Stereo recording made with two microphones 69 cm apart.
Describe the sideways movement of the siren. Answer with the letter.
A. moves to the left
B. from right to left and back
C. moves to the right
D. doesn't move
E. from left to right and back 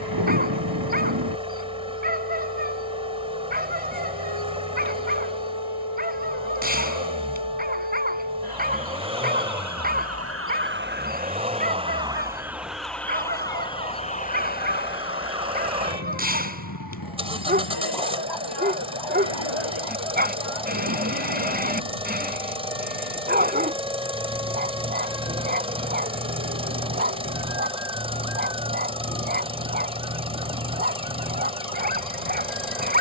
A.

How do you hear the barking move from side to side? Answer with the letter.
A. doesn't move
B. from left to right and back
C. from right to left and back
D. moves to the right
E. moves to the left
A.